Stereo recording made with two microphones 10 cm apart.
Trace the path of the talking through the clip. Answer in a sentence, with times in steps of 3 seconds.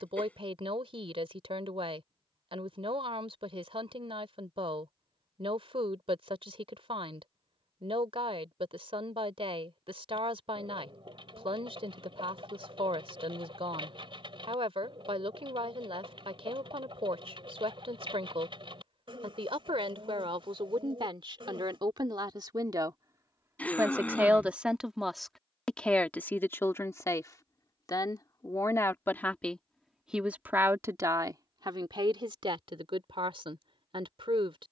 You can hear the talking on the right from 0 s, in the centre from 24 s, on the left from 27 s and on the right from 30 s.